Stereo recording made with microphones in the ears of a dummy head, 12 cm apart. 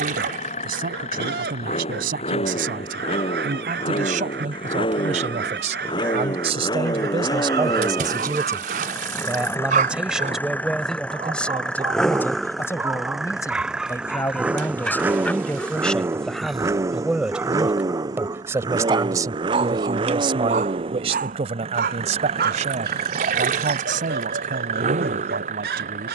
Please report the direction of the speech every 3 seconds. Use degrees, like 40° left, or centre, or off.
70° right, 60° right, 30° right, centre, 20° left, centre, 30° right, 50° right, 70° right.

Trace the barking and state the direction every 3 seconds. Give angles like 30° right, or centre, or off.
80° right, 80° right, 70° right, 40° right, 10° right, centre, 40° right, 70° right, 80° right.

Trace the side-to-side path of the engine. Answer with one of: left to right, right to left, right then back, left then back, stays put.
left to right.